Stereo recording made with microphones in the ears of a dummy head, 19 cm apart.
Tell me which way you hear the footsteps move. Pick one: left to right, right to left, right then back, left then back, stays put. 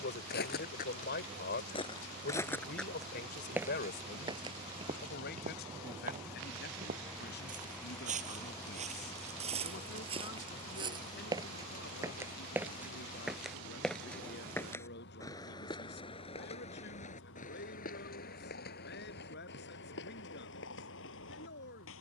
right then back.